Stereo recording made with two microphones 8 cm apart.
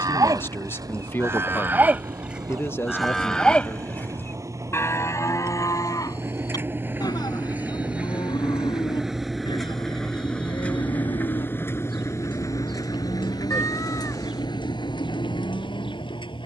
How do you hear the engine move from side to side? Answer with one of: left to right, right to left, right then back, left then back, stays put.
right to left.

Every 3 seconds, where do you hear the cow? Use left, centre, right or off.
right, left, left, left, left, left.